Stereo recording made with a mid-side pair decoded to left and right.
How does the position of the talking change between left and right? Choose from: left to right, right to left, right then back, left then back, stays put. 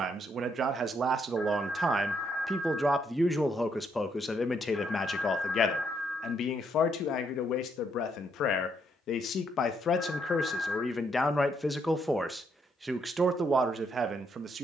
left then back.